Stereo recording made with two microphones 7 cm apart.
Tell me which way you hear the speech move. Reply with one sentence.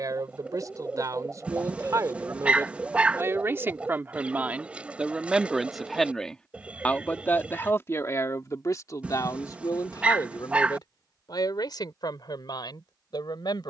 In this clip you hear the speech move to the left.